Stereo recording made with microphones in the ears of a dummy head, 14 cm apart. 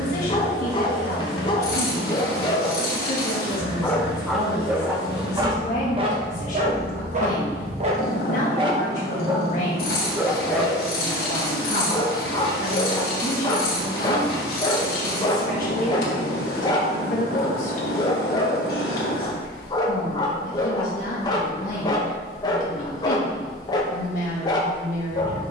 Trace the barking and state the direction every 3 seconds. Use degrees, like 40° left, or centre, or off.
30° left, 10° right, 40° right, centre, 20° left, 20° left, 20° left, 20° left, 20° left.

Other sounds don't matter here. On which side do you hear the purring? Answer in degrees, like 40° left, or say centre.
60° left.